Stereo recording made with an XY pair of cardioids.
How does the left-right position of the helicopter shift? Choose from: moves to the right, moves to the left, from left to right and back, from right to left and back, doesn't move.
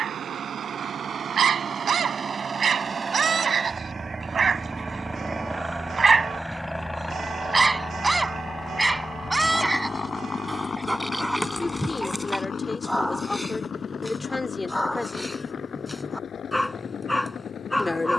moves to the left.